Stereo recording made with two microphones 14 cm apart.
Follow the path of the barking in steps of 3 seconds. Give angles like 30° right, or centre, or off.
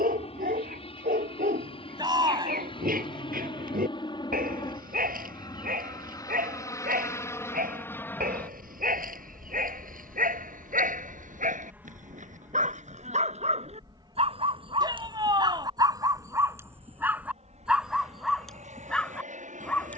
80° right, 80° right, 80° right, 70° right, 50° right, 20° right, 10° left.